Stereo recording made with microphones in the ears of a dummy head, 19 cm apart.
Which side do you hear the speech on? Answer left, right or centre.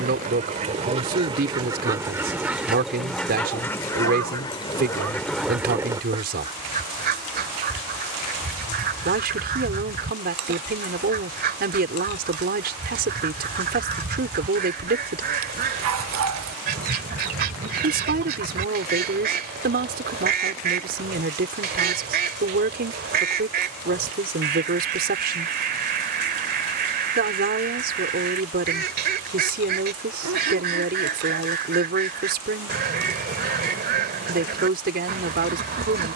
right.